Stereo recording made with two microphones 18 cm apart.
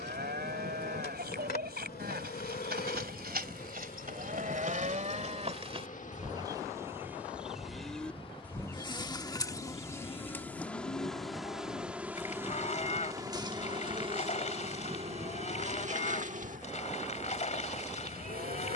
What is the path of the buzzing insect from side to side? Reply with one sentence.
In this clip you hear the buzzing insect go from the left side to the right.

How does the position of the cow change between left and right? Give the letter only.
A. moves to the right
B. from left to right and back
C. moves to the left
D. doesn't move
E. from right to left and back
C.